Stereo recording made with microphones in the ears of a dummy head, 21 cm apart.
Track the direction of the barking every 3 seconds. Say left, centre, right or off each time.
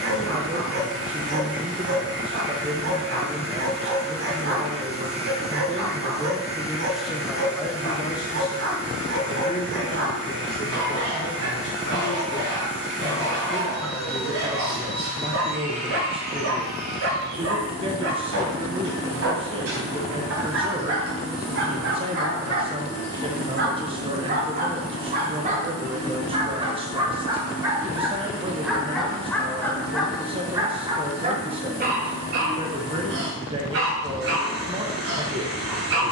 right, right, right, right, right, right, right, right, right, centre, right, right.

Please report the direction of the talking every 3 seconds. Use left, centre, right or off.
right, right, centre, left, centre, right, right, right, right, right, right, right.